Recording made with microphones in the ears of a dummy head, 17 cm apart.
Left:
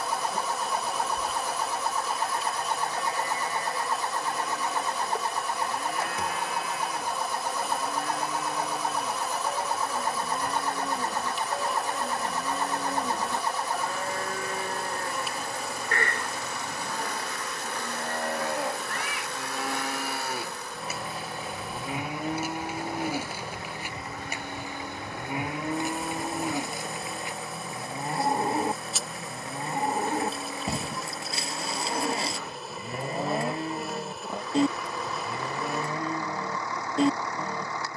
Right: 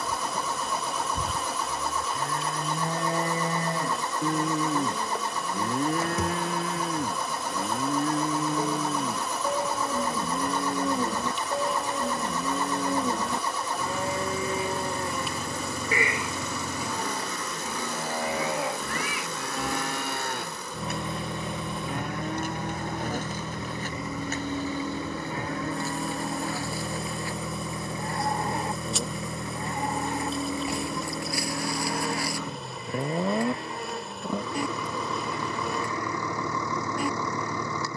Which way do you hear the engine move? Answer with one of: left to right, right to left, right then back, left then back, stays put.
stays put.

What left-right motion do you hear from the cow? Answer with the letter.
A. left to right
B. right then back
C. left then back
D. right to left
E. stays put
D.